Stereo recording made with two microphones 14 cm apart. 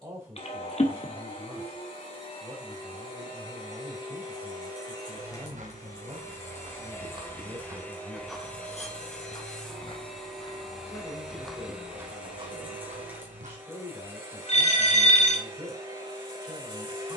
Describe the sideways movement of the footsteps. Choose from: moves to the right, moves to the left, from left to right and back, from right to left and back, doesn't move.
from right to left and back.